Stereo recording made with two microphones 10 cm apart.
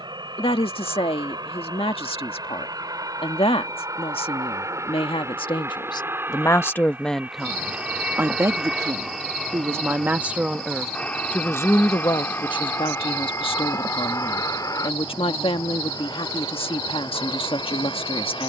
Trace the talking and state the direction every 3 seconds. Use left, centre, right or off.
left, left, centre, centre, left, left.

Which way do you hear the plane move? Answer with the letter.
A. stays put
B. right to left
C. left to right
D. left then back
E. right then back
B.